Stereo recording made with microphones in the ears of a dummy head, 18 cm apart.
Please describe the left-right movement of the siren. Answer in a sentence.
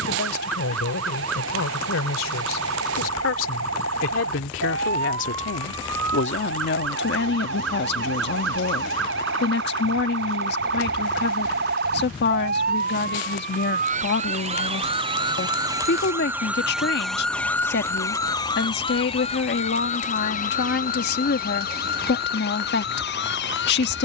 You can hear the siren move from right to left.